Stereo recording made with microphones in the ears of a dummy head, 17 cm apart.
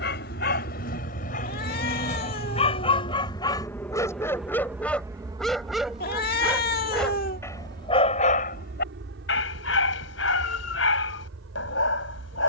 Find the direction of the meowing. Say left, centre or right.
left.